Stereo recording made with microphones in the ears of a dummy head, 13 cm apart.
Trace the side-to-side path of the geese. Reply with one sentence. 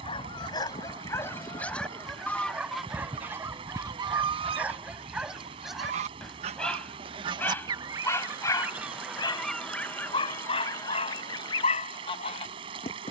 You can hear the geese go right and come back.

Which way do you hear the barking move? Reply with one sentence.
In this clip you hear the barking go right and come back.